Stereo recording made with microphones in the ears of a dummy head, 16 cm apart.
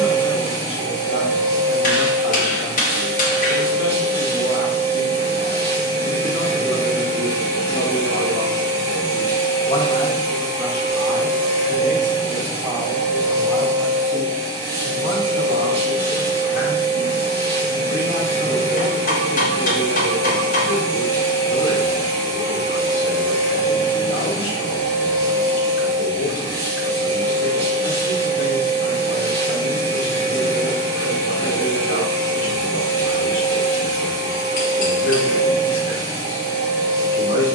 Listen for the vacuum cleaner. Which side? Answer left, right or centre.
right.